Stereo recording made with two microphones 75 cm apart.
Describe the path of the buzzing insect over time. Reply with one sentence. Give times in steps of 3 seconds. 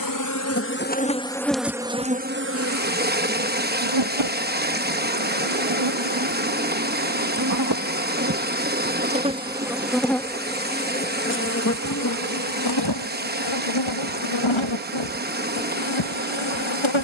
You can hear the buzzing insect in the centre from 0 s, on the right from 3 s, in the centre from 9 s and on the left from 12 s.